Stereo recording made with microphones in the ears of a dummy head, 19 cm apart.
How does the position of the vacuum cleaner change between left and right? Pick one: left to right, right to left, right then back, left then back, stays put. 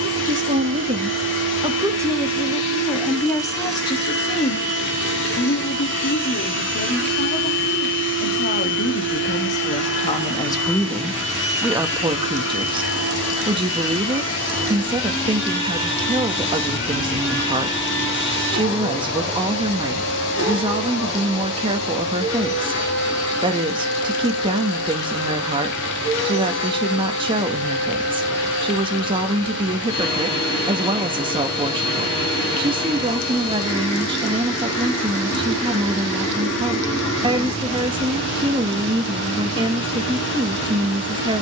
stays put.